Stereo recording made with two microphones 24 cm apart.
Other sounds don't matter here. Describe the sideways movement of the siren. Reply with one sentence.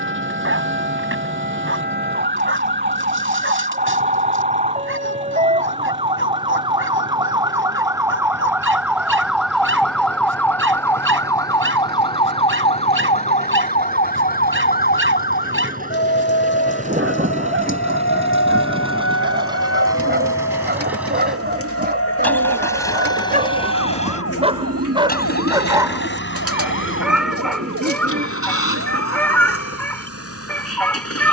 In this clip you hear the siren travel towards the left.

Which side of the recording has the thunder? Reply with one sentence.
In this clip you hear the thunder on the right.